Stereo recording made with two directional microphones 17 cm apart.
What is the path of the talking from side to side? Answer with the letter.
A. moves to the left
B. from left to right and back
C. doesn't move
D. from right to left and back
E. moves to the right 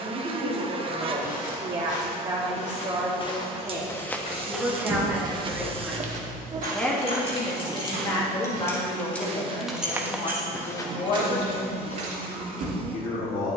A.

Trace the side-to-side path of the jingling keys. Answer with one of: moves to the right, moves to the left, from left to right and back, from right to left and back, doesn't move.
moves to the right.